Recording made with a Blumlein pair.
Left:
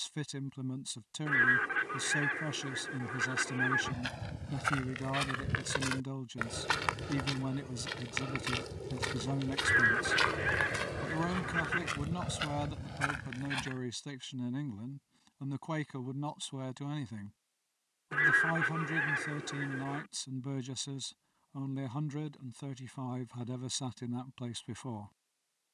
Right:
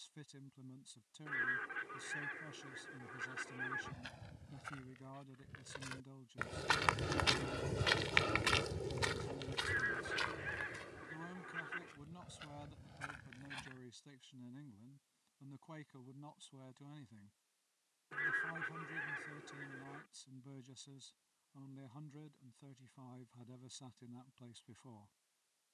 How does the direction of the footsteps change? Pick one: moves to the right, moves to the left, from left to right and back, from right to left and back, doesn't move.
from left to right and back.